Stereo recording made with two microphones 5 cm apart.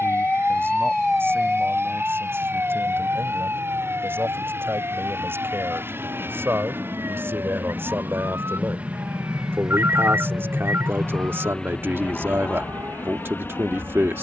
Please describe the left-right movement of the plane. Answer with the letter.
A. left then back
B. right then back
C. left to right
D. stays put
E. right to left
E.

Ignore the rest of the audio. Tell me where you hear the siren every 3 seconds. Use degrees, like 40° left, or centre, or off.
10° right, 50° right, 60° right, 70° right, 70° right.